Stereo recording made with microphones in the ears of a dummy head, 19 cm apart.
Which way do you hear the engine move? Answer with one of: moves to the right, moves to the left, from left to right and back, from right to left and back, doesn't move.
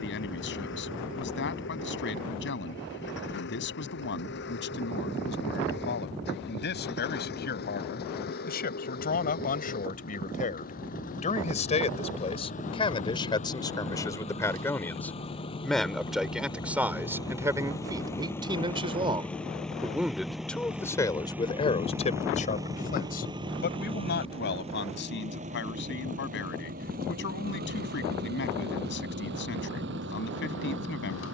moves to the right.